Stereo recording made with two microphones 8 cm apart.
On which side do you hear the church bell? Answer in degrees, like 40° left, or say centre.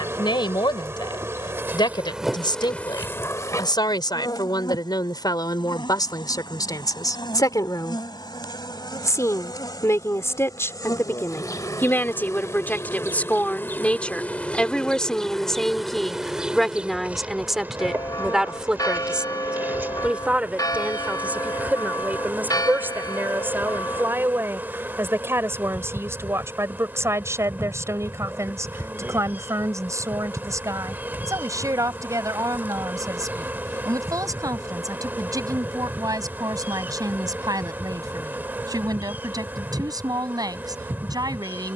40° left.